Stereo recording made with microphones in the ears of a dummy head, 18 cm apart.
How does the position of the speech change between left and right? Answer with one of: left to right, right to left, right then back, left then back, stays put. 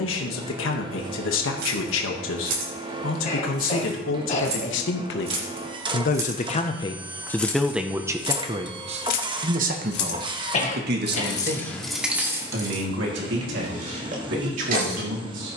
left to right.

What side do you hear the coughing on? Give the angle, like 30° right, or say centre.
40° left.